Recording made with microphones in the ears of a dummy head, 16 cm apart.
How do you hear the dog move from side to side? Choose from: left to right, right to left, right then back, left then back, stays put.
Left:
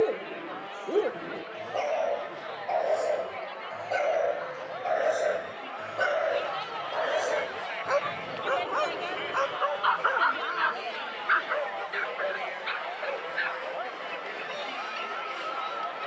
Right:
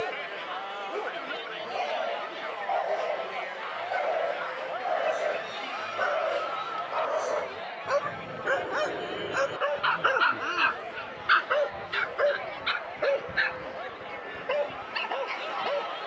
left to right.